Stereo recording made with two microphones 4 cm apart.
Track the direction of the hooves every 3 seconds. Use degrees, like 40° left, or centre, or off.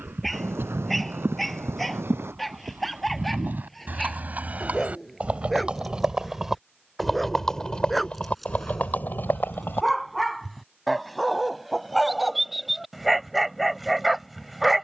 60° right, 40° right, 10° left, 50° left, off.